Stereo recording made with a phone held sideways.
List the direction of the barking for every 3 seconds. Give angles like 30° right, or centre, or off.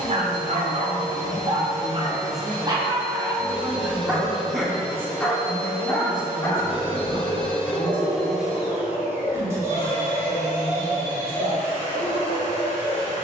40° right, 10° right, 30° left, 40° left, 50° left.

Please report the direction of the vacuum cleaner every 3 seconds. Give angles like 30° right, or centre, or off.
60° left, 50° left, 10° left, 30° right, 40° right.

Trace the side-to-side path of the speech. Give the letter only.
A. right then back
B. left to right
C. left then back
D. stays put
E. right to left
A.